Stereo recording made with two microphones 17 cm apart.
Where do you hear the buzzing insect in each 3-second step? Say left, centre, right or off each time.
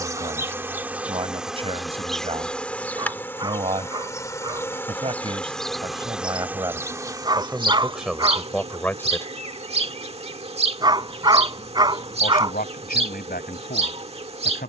centre, centre, right, right, right.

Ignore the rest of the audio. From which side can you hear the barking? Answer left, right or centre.
right.